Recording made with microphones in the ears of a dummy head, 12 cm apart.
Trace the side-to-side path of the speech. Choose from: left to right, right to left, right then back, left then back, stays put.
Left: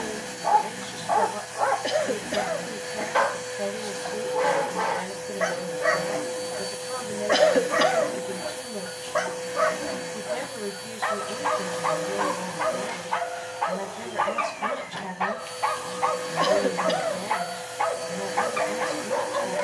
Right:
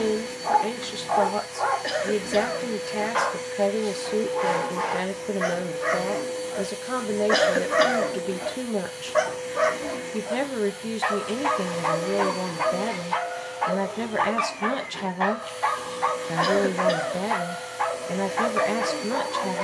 stays put.